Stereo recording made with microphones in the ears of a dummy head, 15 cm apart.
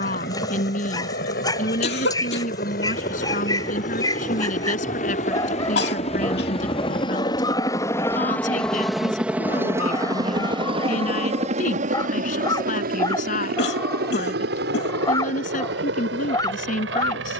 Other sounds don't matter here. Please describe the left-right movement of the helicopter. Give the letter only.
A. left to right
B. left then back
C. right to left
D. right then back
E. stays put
A.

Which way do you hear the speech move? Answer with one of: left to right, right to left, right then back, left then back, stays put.
stays put.